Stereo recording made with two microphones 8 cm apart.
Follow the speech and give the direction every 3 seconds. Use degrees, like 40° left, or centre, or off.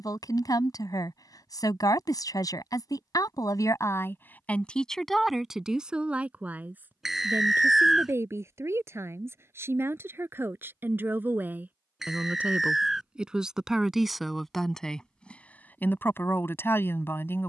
40° left, 20° left, 30° right, 30° right, 10° right, 20° left.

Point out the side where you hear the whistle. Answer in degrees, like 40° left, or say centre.
centre.